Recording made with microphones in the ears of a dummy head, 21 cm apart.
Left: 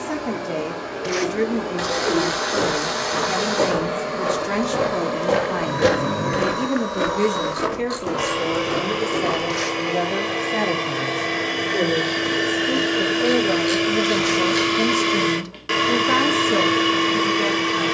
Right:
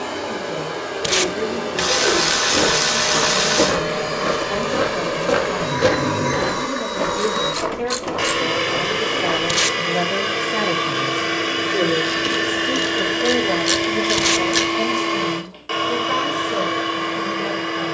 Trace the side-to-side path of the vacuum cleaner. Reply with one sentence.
In this clip you hear the vacuum cleaner move from right to left.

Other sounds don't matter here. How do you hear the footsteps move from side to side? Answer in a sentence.
You can hear the footsteps travel towards the left.